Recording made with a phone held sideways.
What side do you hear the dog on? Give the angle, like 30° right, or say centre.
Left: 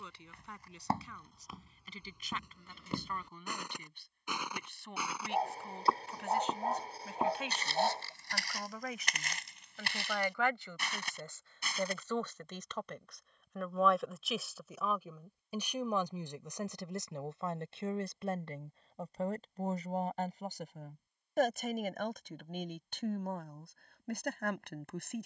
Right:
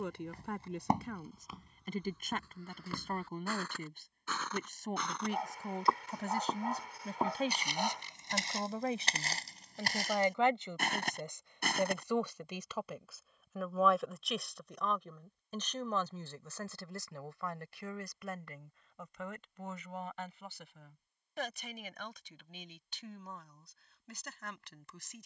30° left.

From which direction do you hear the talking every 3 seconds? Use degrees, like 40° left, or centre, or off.
50° right, 50° right, 40° right, 20° right, centre, 20° left, 40° left, 50° left, 60° left.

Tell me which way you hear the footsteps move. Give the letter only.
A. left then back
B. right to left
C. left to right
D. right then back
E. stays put
A.